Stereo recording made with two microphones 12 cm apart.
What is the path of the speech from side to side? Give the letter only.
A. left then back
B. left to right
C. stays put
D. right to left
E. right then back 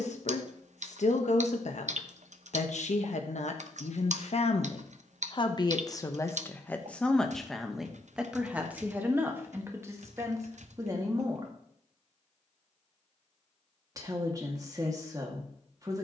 B.